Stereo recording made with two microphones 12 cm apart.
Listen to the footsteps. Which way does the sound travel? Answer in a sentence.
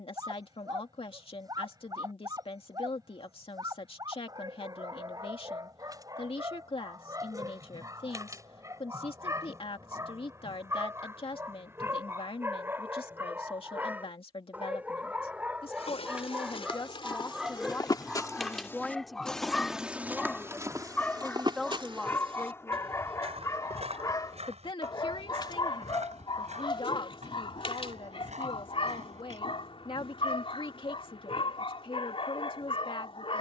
In this clip you hear the footsteps move from left to right.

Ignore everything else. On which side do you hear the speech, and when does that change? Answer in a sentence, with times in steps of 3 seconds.
In this clip you hear the speech on the left from 0 s, in the centre from 18 s and on the left from 24 s.